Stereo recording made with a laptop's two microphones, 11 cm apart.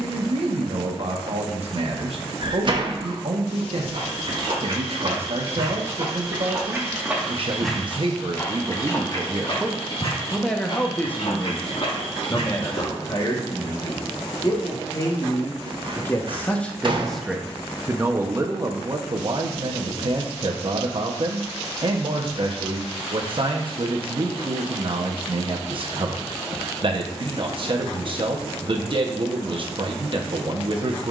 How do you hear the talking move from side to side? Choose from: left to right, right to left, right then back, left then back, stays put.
left then back.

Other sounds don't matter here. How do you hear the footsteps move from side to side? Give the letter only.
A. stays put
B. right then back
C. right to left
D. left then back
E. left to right
C.